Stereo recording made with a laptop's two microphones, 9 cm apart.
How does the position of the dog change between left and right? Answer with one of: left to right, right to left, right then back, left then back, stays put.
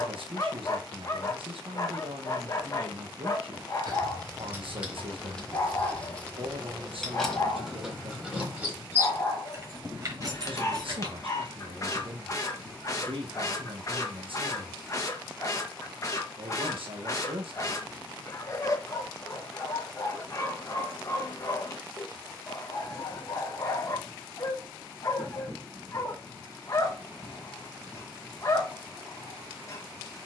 stays put.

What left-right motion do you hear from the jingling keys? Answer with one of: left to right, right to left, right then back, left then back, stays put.
left then back.